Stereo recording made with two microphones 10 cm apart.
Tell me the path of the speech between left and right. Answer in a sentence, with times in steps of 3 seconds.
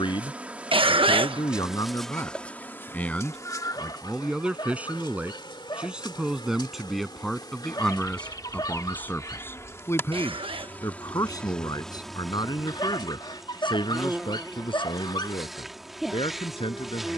You can hear the speech on the left from 0 s, in the centre from 3 s and on the left from 9 s.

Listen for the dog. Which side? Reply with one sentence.
You can hear the dog on the left.